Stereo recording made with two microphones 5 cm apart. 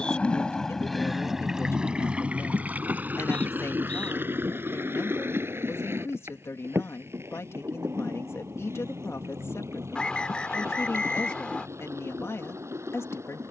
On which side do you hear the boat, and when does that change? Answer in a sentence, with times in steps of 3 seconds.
In this clip you hear the boat in the centre from 0 s and on the right from 3 s.